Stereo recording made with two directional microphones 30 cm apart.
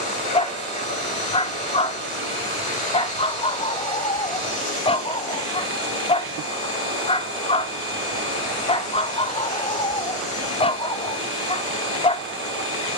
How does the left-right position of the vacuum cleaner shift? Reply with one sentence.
In this clip you hear the vacuum cleaner stay in one place.